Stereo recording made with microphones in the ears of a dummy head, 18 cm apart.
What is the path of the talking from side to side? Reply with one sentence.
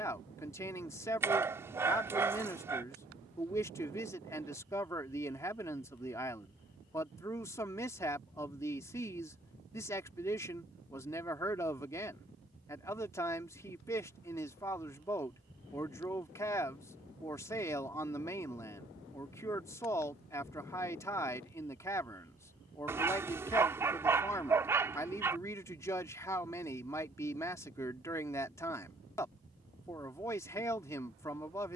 In this clip you hear the talking stay put.